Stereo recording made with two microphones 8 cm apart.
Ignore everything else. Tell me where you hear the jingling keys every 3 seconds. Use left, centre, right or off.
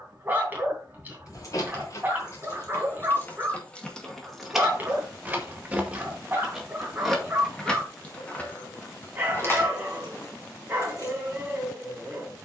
left, centre, centre, left.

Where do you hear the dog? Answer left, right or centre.
right.